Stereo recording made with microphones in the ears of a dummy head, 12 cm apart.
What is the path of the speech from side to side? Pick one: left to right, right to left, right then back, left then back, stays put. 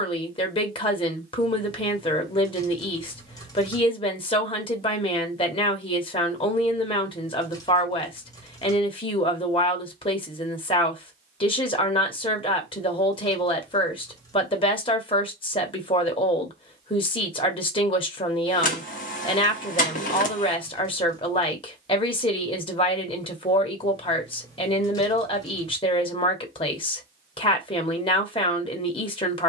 stays put.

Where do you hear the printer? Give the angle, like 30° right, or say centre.
60° left.